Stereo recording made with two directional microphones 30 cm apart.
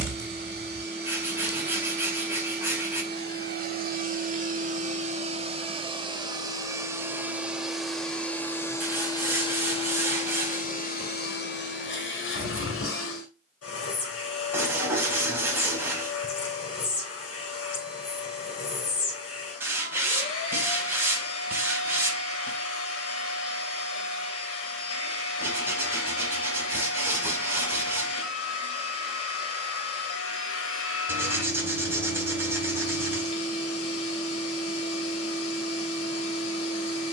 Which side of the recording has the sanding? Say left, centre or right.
centre.